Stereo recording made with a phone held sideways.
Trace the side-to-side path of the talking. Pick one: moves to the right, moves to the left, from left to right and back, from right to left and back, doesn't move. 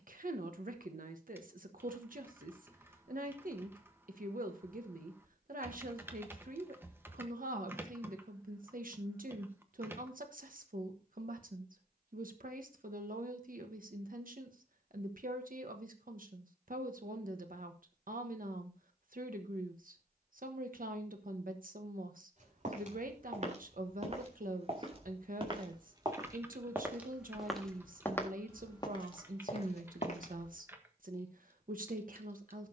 doesn't move.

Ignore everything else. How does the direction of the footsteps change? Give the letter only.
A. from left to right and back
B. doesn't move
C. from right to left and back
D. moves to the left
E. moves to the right
D.